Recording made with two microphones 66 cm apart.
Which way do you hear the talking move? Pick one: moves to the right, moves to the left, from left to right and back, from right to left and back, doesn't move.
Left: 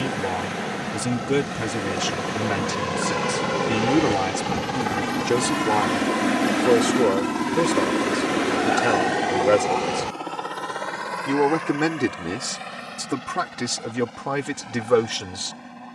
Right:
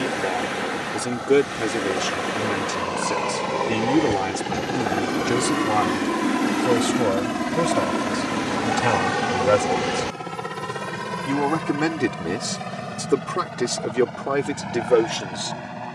from left to right and back.